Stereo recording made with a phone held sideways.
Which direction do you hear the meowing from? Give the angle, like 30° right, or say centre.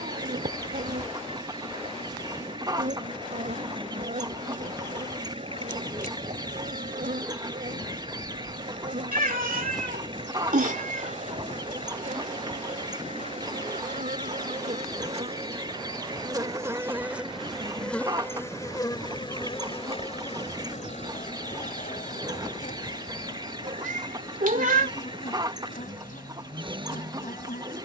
60° right.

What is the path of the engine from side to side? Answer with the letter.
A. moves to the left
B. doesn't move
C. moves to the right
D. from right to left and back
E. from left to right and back
B.